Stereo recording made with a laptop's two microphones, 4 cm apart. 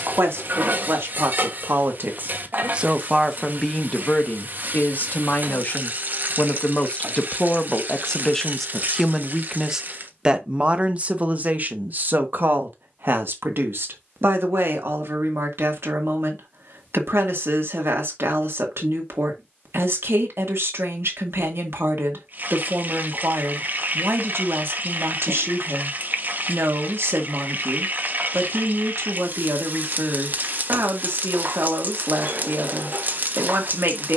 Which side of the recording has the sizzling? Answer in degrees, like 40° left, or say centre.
50° right.